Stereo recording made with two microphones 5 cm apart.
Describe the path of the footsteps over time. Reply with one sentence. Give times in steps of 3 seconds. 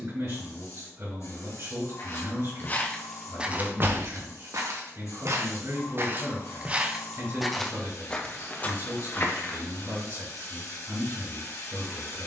In this clip you hear the footsteps on the left from 0 s, on the right from 3 s, in the centre from 6 s and on the left from 9 s.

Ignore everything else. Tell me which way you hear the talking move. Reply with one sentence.
In this clip you hear the talking stay in one place.